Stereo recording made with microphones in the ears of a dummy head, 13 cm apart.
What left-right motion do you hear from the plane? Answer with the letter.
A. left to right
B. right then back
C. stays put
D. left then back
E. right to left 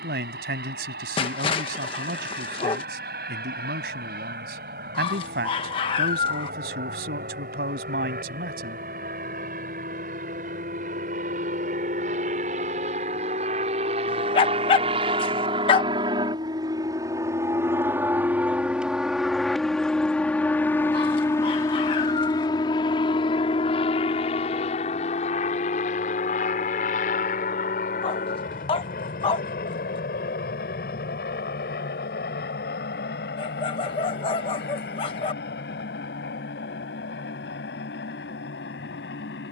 E.